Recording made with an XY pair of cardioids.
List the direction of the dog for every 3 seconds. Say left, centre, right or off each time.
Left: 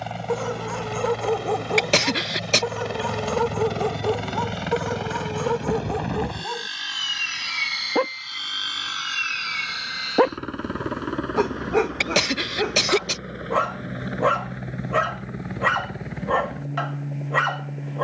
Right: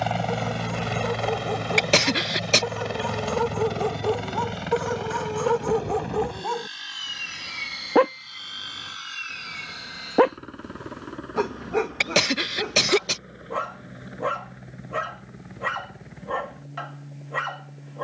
left, centre, right, centre, left, left.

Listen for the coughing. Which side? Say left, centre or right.
centre.